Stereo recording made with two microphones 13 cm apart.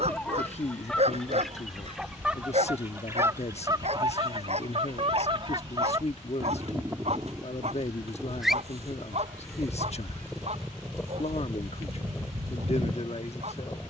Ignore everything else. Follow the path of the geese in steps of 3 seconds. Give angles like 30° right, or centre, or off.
centre, 40° right, 10° right, 10° left, 20° left.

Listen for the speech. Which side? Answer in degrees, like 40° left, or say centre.
50° left.